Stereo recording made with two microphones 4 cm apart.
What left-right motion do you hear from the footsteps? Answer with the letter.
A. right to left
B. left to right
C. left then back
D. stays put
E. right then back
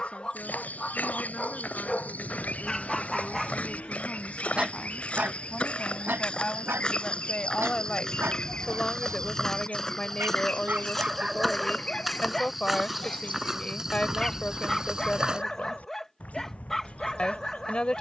B.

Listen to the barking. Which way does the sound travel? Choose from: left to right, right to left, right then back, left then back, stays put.
right then back.